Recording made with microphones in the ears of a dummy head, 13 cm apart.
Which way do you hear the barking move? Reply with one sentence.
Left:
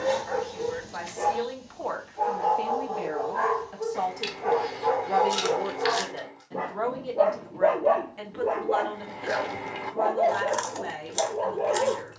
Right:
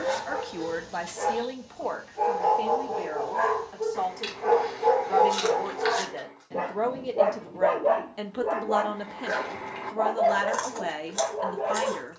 You can hear the barking move from left to right and back again.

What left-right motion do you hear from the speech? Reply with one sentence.
You can hear the speech move from right to left and back again.